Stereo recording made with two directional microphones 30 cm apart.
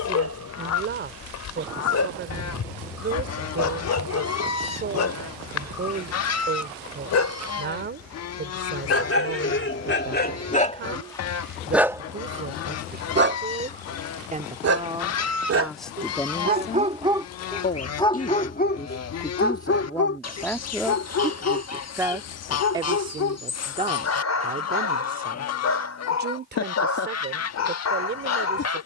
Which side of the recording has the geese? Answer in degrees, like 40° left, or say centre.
60° left.